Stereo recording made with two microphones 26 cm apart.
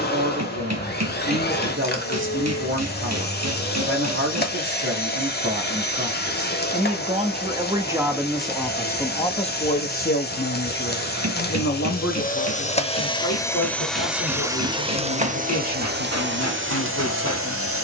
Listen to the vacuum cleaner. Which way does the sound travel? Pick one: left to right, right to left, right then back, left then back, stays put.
left to right.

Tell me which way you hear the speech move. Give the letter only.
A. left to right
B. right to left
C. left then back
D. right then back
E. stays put
B.